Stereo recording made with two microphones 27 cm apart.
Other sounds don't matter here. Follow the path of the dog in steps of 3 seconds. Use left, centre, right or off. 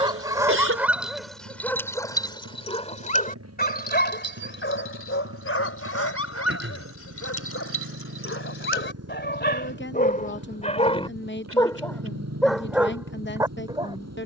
centre, left, left, left, centre.